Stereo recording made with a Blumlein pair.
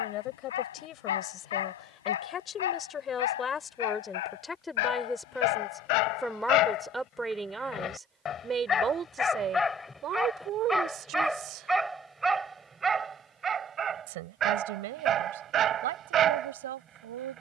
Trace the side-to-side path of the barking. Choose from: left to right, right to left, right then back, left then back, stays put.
left to right.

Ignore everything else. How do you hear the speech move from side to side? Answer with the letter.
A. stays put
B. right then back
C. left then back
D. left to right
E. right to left
D.